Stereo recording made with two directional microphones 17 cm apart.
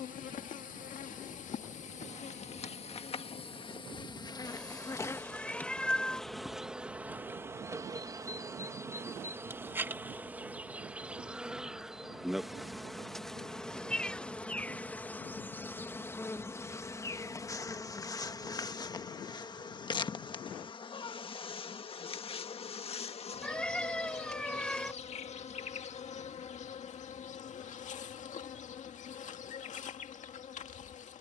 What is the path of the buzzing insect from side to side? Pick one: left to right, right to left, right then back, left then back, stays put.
right then back.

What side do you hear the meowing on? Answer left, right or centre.
centre.